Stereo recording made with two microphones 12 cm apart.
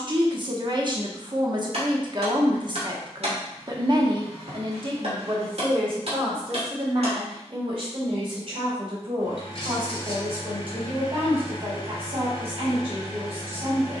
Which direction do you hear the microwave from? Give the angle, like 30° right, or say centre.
50° left.